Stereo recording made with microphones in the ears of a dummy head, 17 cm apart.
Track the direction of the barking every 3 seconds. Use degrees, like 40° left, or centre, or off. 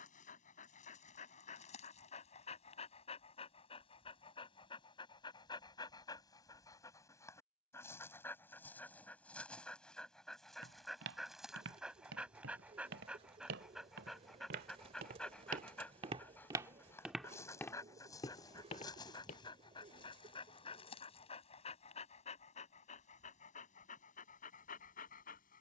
40° left, 30° left, 10° left, centre, centre, 10° left, 20° left, 40° left, 40° left.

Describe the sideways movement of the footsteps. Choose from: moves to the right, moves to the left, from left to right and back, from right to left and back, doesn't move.
moves to the left.